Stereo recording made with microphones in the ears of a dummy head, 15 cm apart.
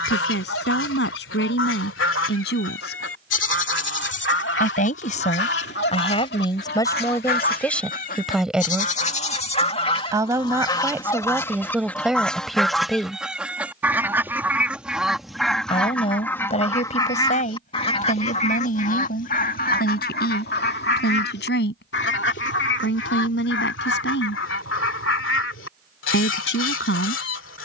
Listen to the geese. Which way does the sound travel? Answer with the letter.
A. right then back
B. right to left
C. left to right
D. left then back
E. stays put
A.